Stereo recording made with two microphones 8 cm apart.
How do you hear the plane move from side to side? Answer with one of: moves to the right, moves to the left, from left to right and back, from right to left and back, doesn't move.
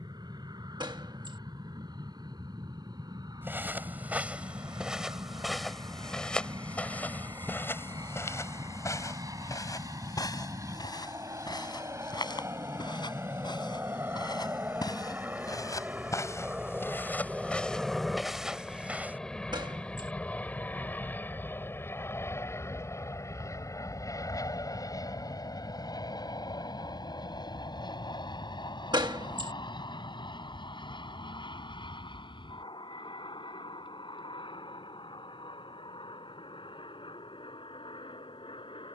moves to the left.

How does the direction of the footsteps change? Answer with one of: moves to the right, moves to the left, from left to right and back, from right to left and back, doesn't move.
from right to left and back.